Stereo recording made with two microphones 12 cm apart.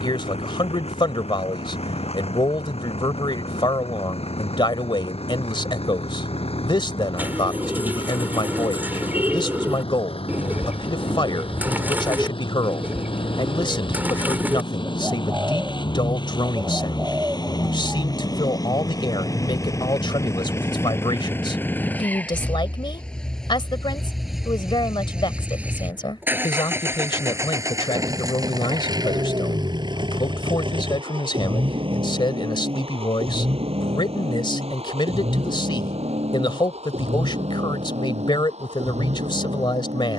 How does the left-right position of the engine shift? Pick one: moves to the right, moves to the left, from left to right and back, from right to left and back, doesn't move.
moves to the right.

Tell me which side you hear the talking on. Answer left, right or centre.
left.